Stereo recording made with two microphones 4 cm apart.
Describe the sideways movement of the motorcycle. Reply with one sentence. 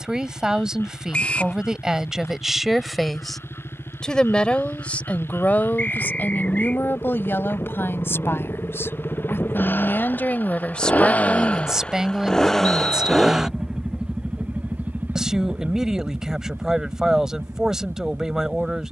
In this clip you hear the motorcycle go from the left side to the right.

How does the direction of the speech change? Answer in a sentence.
You can hear the speech move from right to left and back again.